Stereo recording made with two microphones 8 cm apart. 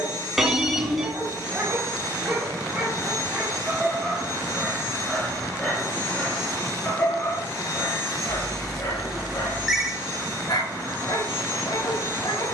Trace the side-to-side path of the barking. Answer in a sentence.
You can hear the barking move from right to left.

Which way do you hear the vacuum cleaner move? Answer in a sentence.
You can hear the vacuum cleaner stay in one place.